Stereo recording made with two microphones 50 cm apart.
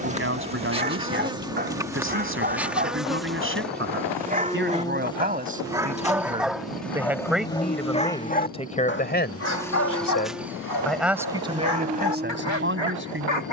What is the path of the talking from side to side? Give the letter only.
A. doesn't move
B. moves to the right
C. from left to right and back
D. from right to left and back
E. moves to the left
D.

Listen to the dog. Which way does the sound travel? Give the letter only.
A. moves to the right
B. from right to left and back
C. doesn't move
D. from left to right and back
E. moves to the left
E.